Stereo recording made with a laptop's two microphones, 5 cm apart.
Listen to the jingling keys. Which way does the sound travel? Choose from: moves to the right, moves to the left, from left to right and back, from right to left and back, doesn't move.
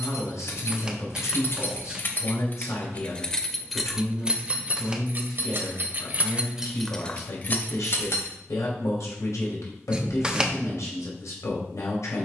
from left to right and back.